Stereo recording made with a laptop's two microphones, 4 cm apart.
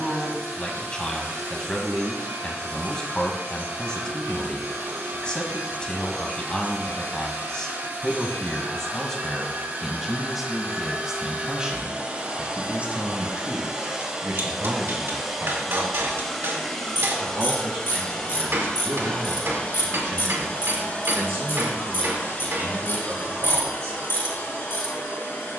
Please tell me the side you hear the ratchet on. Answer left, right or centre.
left.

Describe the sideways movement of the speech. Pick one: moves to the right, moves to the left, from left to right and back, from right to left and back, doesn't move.
moves to the right.